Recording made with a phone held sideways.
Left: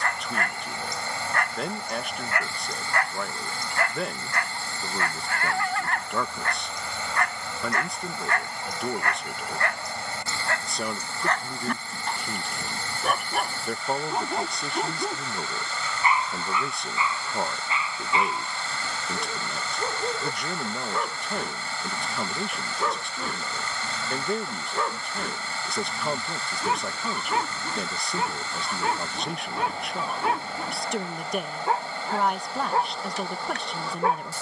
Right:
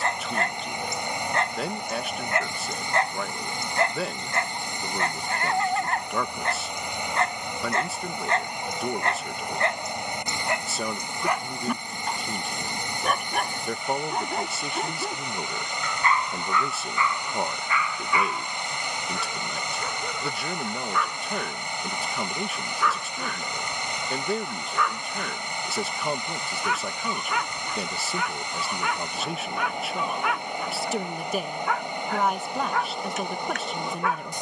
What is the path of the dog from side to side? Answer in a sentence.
You can hear the dog go from the right side to the left.